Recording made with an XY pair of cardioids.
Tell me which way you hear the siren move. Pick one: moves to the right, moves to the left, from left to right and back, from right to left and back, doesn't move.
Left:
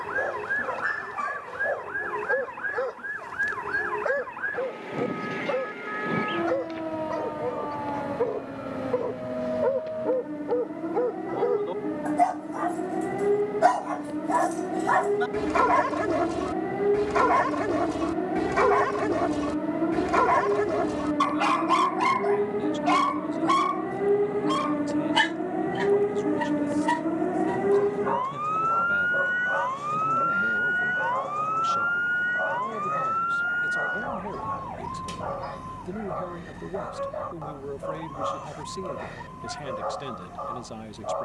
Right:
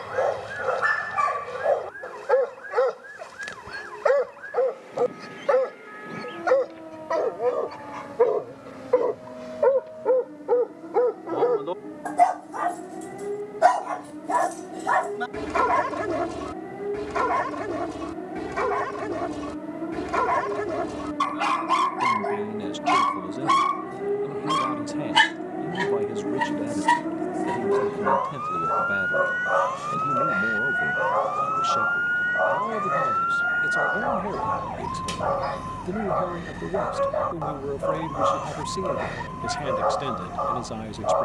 moves to the right.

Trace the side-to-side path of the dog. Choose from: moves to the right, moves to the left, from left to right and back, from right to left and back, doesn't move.
from right to left and back.